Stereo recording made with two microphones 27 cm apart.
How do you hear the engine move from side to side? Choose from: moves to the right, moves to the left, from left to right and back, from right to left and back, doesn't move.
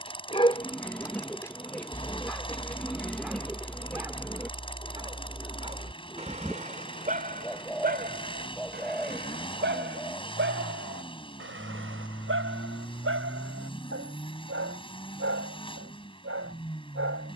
doesn't move.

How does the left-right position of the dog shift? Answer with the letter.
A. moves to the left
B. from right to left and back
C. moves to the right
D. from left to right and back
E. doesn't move
C.